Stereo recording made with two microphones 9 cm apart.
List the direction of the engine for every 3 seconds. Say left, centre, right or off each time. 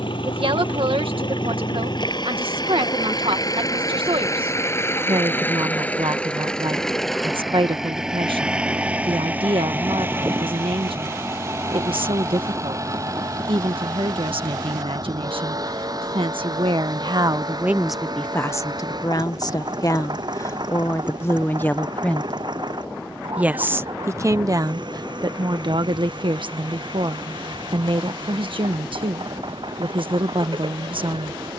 left, left, centre, right, right, right, right, right, right, right, right.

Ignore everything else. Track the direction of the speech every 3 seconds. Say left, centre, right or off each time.
right, right, right, right, right, right, left, centre, right, right, right.